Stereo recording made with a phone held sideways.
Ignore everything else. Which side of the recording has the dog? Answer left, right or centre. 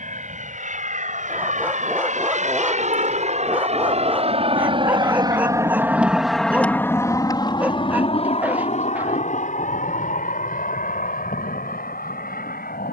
centre.